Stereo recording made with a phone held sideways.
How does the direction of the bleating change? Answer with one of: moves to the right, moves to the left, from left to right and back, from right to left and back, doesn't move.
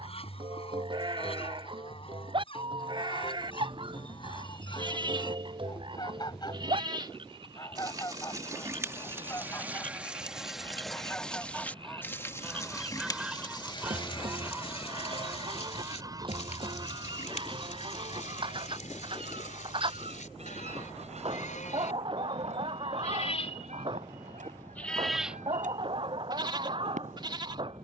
from right to left and back.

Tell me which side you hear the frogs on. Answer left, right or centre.
right.